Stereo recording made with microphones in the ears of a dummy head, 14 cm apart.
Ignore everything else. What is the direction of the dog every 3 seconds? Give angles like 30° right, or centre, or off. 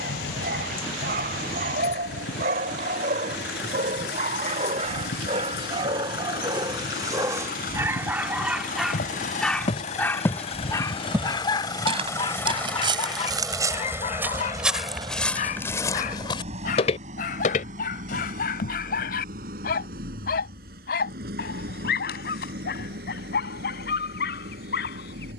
60° right, 50° right, 20° right, 20° left, 40° left, 60° left, 60° left, 70° left, 70° left.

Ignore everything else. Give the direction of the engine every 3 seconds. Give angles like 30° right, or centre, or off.
80° left, 70° left, 60° left, 40° left, centre, 40° right, 60° right, 70° right, 70° right.